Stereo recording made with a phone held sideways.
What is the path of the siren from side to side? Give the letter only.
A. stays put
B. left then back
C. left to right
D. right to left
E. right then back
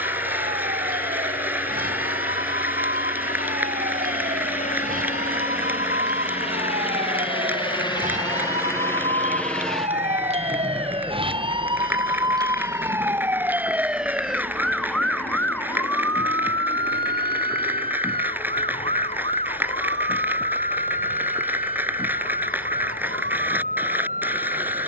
D.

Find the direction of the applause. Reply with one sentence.
You can hear the applause in the centre.